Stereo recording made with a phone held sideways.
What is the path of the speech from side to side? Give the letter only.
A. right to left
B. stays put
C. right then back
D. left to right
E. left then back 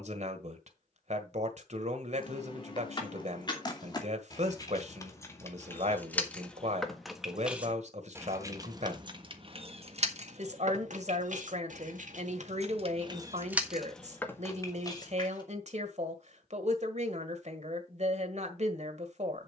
B.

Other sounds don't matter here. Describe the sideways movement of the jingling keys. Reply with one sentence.
You can hear the jingling keys move from left to right and back again.